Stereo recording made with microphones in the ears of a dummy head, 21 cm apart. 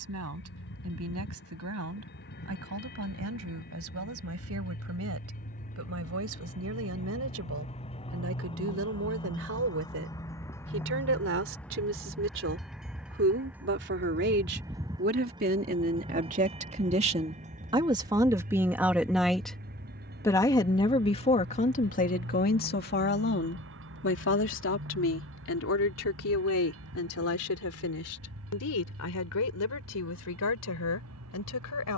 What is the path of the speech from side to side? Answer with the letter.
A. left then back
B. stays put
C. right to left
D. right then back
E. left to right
C.